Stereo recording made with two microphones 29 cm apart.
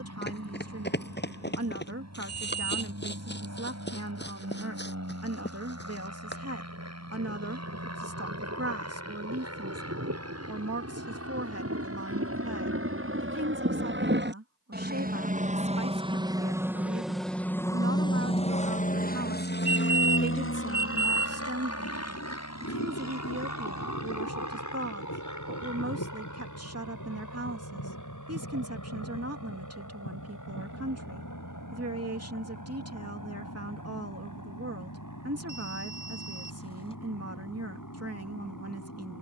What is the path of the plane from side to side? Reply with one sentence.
You can hear the plane move to the left.